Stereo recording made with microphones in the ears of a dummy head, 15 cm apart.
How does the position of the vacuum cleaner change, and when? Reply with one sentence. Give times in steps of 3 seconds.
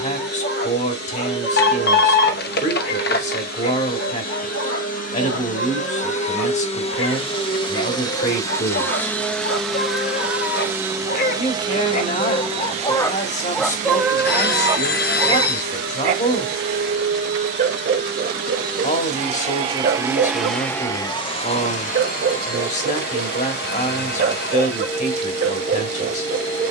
In this clip you hear the vacuum cleaner on the left from 0 s, in the centre from 9 s, on the right from 12 s and on the left from 21 s.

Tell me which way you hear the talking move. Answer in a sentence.
You can hear the talking stay in one place.